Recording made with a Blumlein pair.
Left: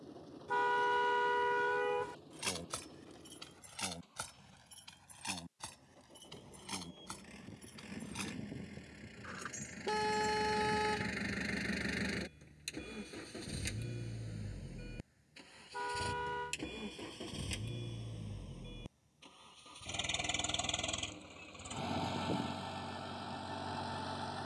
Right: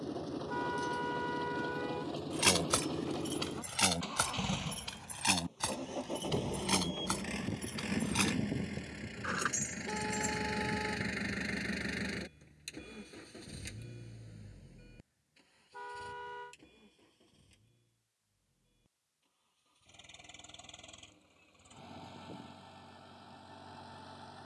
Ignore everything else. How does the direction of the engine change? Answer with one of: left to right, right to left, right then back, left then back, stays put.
right to left.